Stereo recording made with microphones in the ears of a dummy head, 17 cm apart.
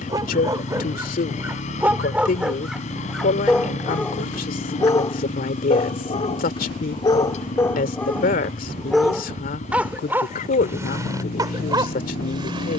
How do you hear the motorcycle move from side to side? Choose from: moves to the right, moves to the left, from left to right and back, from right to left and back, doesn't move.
doesn't move.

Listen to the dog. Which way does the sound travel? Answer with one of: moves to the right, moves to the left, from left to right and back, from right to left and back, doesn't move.
from right to left and back.